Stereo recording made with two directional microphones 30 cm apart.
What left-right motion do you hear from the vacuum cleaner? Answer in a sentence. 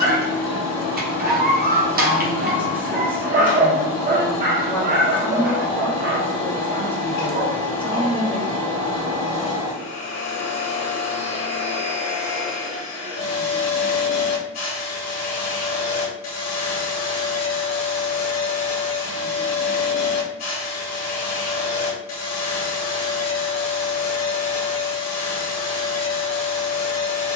In this clip you hear the vacuum cleaner stay in one place.